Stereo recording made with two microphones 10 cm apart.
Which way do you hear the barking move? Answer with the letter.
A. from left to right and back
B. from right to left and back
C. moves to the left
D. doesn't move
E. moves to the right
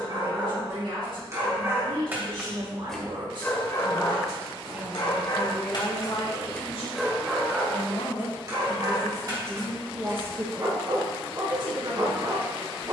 B.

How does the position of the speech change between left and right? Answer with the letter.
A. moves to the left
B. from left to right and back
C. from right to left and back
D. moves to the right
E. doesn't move
C.